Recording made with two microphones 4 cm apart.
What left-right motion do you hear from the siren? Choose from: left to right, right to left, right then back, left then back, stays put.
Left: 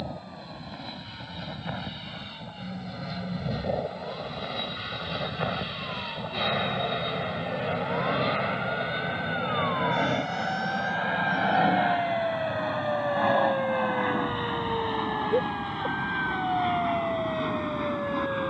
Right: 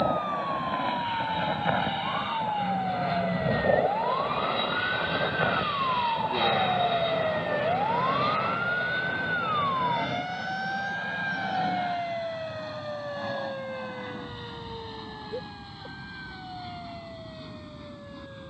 right to left.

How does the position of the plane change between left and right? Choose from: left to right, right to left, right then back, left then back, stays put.
right to left.